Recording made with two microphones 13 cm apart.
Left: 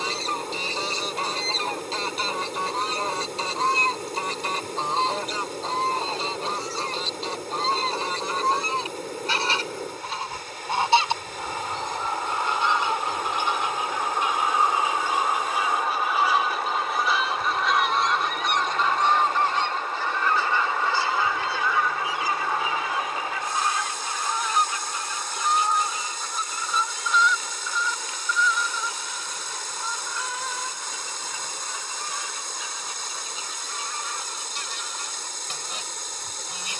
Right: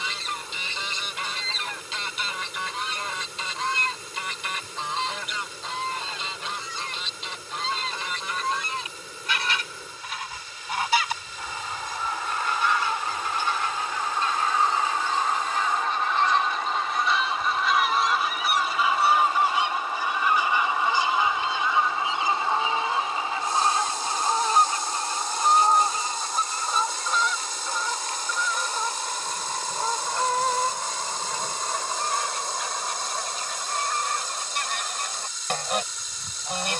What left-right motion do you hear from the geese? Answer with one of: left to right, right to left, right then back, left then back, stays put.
left to right.